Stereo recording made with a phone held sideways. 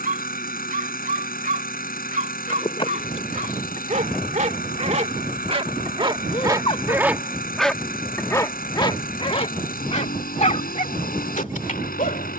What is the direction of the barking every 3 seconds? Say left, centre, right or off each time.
right, right, centre, left.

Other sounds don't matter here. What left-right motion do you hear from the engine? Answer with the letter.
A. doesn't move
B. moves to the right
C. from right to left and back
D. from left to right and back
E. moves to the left
A.